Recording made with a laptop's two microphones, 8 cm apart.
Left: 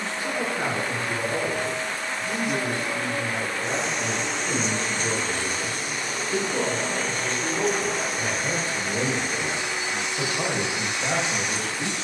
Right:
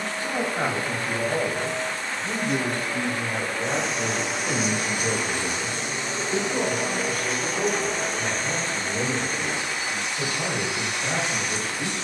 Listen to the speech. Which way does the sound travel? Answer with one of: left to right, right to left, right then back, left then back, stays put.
right to left.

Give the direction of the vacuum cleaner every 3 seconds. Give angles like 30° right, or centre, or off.
20° left, 10° right, centre, 20° left.